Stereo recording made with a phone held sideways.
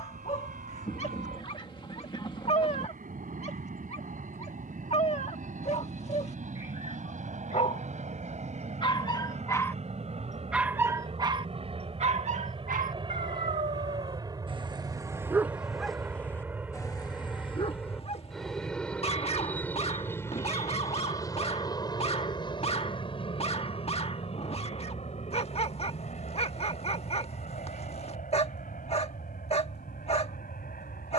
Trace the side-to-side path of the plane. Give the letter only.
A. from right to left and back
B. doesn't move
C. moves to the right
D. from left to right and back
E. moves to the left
E.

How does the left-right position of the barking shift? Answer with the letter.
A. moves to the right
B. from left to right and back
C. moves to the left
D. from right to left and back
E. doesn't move
B.